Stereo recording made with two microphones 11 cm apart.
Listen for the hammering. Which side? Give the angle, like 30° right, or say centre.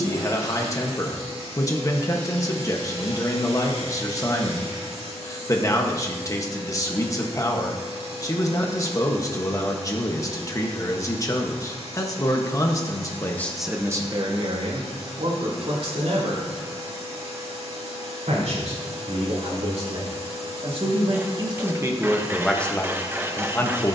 20° right.